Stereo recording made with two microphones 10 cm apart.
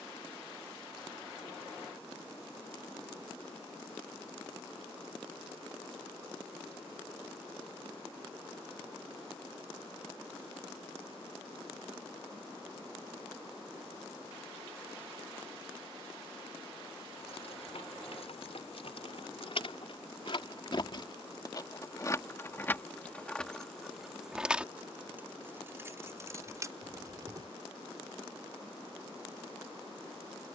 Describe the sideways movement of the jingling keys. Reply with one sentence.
You can hear the jingling keys go from the left side to the right.